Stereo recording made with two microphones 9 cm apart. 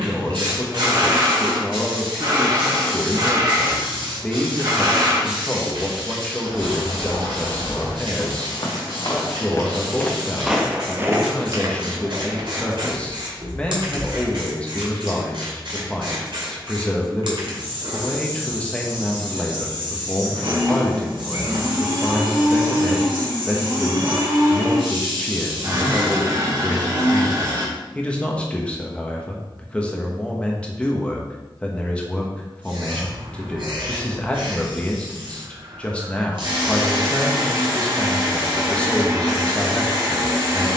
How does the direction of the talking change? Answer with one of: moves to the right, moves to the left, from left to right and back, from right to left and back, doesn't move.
doesn't move.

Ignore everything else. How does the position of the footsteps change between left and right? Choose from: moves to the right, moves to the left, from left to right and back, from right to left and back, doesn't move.
moves to the right.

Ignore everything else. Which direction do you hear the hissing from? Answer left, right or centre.
right.